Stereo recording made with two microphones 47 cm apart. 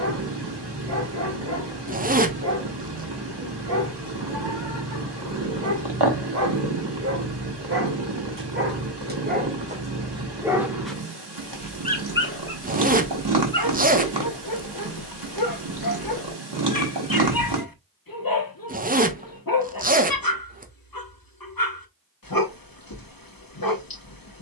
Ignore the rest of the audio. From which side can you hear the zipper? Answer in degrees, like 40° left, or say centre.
20° right.